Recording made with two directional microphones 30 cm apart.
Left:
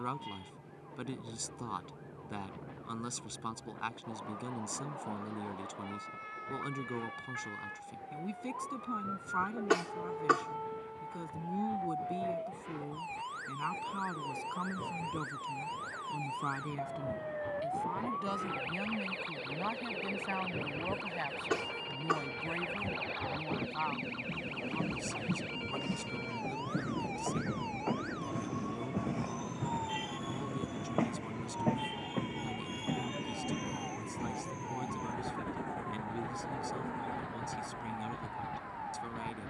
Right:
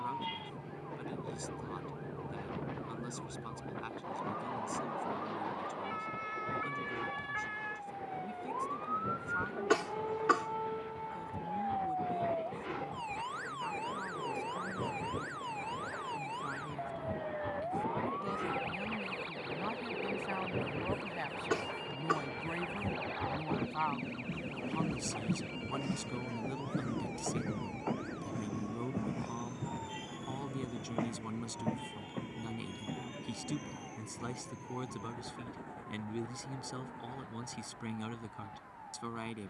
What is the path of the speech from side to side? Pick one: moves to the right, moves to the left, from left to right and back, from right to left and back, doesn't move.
moves to the right.